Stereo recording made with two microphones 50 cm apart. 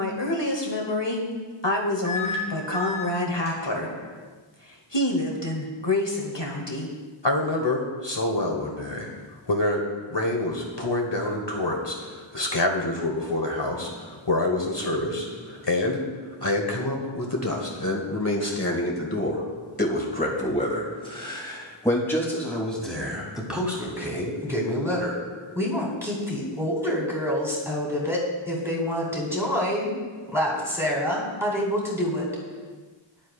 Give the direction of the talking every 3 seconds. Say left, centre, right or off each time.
left, left, left, left, left, left, left, centre, centre, centre, centre.